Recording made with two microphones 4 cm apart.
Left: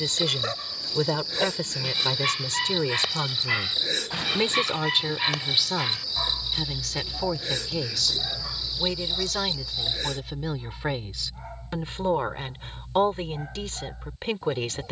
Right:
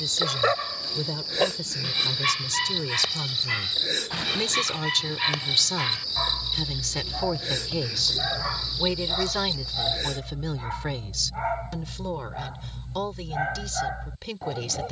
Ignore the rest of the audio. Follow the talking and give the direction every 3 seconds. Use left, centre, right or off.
left, left, centre, centre, left.